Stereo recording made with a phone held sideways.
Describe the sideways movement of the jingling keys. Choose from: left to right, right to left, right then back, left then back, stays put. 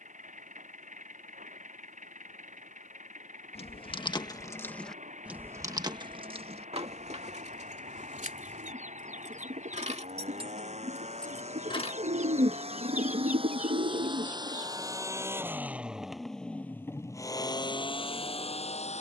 right then back.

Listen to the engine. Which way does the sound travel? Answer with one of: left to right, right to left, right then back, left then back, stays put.
right to left.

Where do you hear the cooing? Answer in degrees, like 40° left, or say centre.
60° right.